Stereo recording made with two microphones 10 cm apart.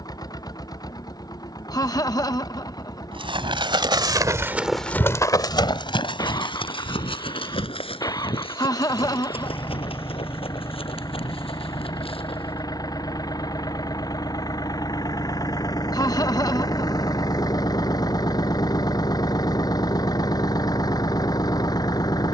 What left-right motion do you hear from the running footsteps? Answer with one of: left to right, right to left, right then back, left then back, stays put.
right to left.